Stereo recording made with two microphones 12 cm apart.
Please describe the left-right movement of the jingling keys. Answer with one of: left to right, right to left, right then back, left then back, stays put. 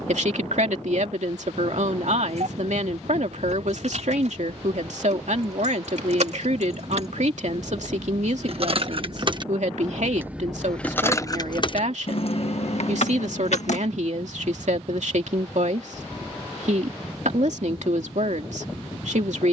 right to left.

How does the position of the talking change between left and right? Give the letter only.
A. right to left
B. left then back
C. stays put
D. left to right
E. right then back
C.